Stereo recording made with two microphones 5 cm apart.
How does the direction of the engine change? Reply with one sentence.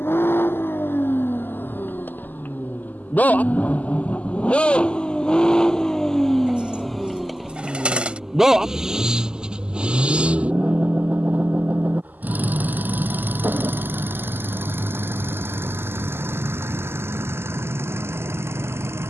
You can hear the engine move to the right.